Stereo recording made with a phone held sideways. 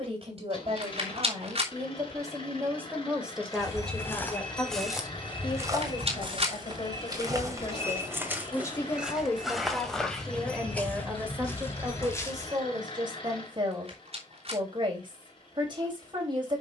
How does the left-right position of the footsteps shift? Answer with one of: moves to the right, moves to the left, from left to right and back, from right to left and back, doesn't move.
from left to right and back.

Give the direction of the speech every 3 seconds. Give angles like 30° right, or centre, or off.
30° right, 20° left, 30° left, centre, 30° right, 40° right.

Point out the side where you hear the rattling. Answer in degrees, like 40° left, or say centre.
50° right.